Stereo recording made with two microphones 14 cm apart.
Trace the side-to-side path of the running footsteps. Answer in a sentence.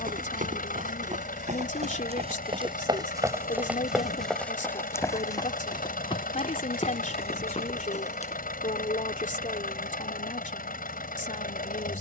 You can hear the running footsteps move to the left.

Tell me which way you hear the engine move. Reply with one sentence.
In this clip you hear the engine stay put.